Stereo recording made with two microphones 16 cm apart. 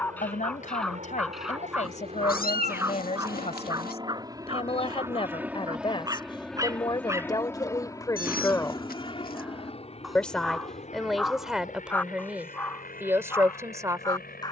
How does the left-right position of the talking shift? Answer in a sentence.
You can hear the talking move from left to right.